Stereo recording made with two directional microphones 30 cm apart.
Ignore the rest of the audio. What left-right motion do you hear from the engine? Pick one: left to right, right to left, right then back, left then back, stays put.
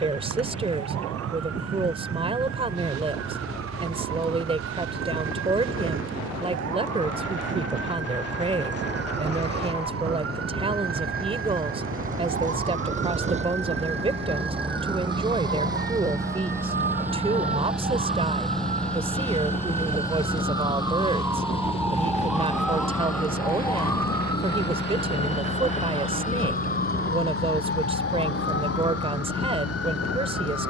right to left.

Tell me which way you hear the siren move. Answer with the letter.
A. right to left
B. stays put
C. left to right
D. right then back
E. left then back
A.